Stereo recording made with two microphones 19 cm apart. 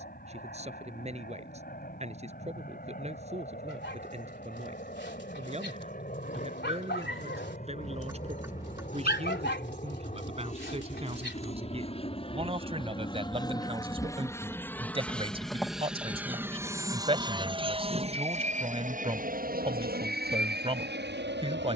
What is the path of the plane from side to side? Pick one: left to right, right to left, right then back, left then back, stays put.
left to right.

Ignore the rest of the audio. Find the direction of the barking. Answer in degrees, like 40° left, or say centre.
70° left.